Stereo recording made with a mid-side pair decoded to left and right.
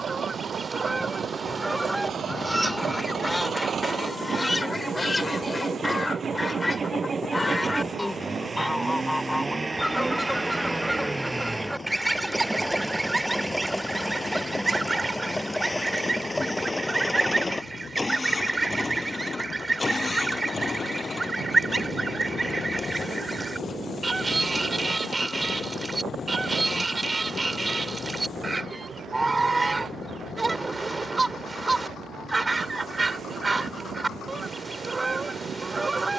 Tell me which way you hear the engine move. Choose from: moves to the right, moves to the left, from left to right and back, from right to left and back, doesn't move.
moves to the left.